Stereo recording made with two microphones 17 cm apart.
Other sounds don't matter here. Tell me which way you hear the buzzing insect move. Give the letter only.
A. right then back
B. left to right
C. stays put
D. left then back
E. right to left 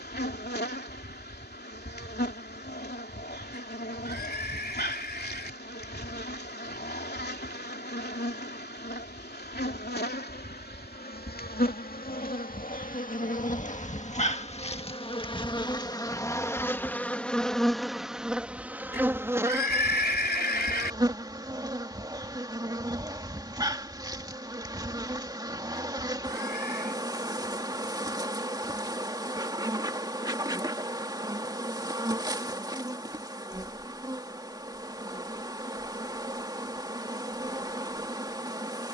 B.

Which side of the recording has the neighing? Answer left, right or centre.
left.